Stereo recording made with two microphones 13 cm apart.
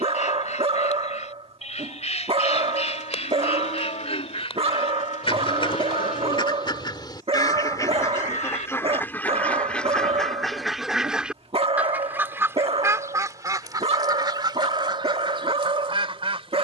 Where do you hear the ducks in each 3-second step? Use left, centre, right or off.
left, left, left, centre, right, right.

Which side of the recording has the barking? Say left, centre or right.
right.